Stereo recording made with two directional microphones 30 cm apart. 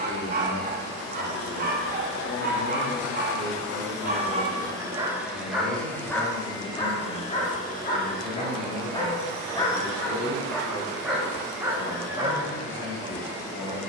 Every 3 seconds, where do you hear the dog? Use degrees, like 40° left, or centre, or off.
30° right, 20° right, 20° left, centre, 20° right.